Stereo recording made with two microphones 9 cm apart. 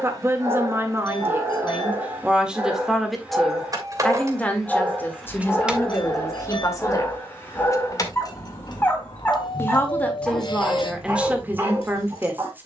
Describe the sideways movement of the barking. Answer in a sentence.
In this clip you hear the barking move from right to left and back again.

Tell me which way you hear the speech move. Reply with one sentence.
In this clip you hear the speech go left and come back.